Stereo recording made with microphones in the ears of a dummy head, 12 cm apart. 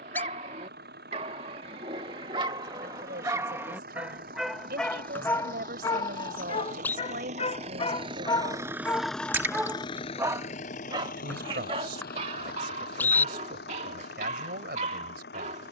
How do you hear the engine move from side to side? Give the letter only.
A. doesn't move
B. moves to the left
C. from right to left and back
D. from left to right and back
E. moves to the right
B.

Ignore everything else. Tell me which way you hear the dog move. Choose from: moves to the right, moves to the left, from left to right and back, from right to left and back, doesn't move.
from right to left and back.